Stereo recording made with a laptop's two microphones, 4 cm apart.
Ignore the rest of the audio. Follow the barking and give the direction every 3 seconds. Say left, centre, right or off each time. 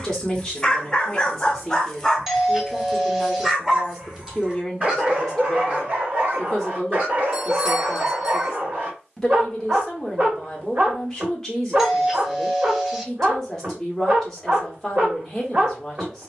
centre, right, right, right, right, right.